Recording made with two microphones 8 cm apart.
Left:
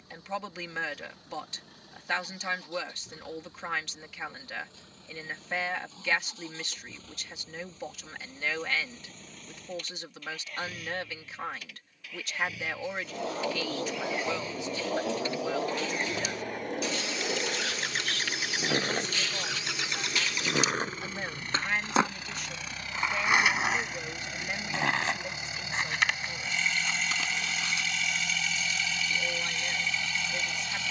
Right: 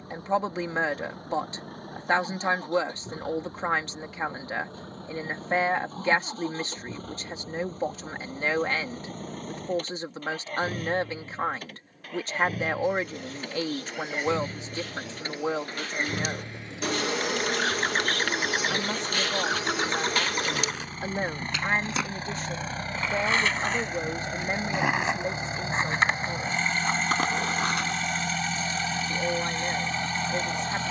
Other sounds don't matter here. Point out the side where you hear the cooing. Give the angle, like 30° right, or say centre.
60° right.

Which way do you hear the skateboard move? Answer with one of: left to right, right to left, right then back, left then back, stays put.
left to right.